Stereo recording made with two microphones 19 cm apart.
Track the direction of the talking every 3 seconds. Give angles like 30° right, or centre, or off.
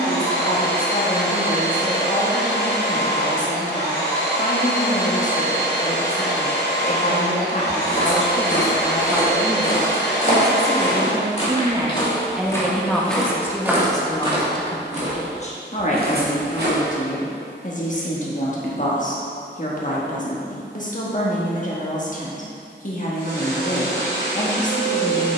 40° left, 40° left, 30° left, 20° right, 10° left, 40° left, 40° left, 40° left, 40° left.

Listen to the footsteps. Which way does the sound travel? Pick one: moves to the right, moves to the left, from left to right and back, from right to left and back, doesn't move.
moves to the right.